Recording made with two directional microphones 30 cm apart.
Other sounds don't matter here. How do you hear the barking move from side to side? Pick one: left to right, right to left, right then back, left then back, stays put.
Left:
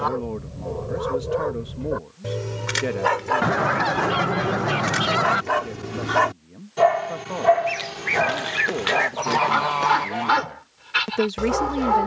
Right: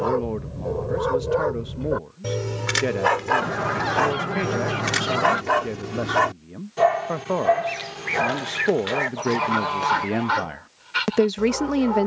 right to left.